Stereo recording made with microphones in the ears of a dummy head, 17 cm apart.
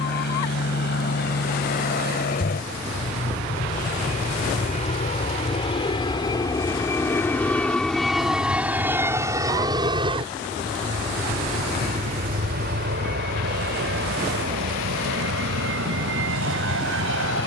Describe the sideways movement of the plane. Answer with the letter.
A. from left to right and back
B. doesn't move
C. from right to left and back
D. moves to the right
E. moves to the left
D.